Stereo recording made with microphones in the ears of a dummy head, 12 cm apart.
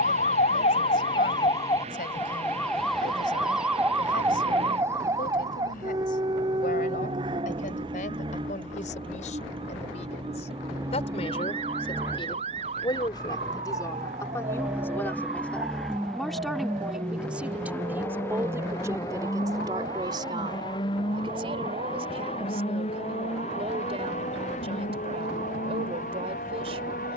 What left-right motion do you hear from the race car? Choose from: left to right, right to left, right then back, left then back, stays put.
right to left.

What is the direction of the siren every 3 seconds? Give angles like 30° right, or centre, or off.
30° left, 10° right, 30° right, 40° right, 40° right, 50° right, 50° right, 50° right, 50° right.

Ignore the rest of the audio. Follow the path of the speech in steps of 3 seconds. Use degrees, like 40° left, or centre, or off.
70° left, 70° left, 60° left, 50° left, 30° left, centre, 20° right, 40° right, 40° right.